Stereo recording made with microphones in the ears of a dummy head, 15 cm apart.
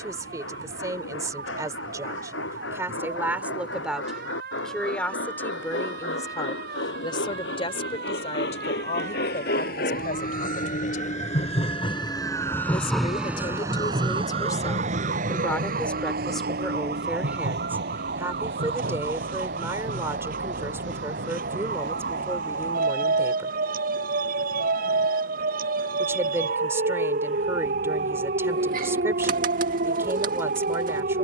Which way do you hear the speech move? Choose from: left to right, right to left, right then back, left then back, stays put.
left then back.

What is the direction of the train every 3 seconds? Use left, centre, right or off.
left, left, left, left, centre, right, right, right, right, right, right.